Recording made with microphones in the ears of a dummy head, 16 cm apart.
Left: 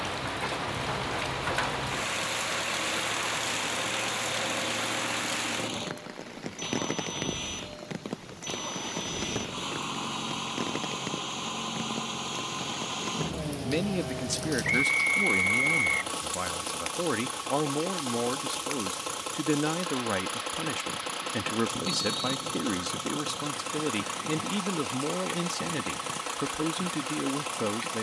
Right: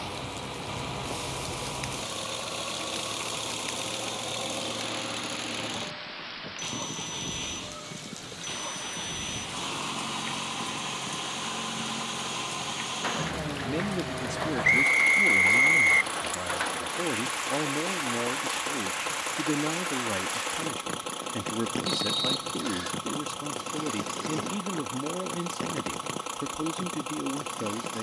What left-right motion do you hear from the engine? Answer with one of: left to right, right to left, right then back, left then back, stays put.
stays put.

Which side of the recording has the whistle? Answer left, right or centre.
right.